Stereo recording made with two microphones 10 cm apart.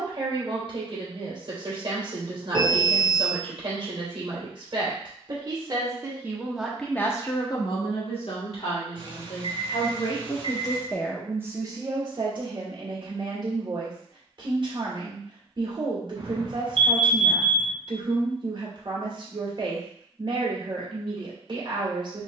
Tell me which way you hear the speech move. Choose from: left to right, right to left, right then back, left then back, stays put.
left then back.